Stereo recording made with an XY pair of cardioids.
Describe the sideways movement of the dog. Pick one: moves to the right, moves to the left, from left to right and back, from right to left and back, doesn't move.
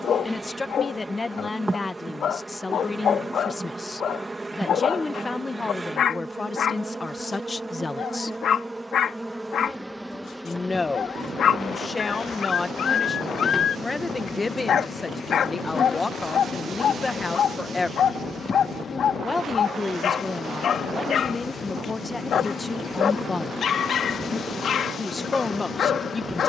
doesn't move.